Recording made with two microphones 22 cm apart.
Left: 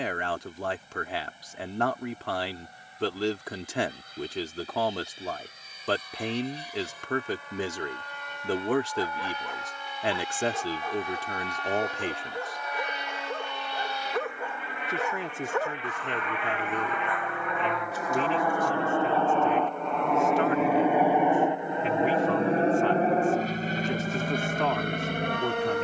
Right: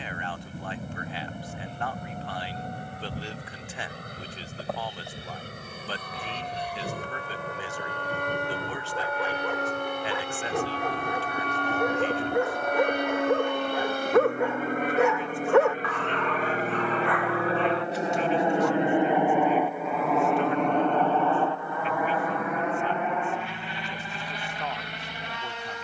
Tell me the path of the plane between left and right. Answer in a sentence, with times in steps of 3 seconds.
In this clip you hear the plane on the right from 0 s, in the centre from 18 s and on the left from 21 s.